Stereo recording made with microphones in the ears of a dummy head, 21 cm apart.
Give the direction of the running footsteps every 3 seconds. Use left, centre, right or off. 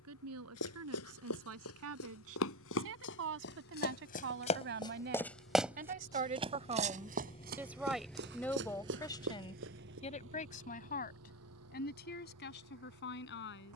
left, left, right, right, off.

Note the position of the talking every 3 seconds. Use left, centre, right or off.
right, right, centre, left, left.